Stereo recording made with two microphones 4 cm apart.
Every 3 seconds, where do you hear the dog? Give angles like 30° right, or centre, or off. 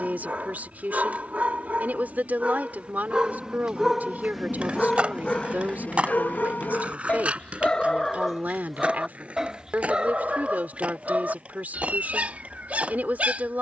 30° right, 10° left, 30° left, 20° right, 30° right.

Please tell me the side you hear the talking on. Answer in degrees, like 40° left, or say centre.
40° right.